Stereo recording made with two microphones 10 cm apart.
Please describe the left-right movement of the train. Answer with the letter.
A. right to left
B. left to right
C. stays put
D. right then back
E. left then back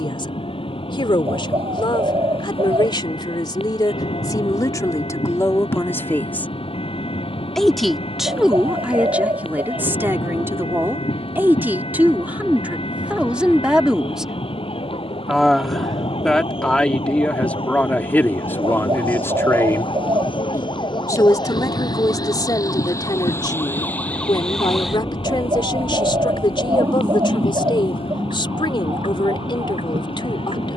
C.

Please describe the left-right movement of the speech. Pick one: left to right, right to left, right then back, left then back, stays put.
right then back.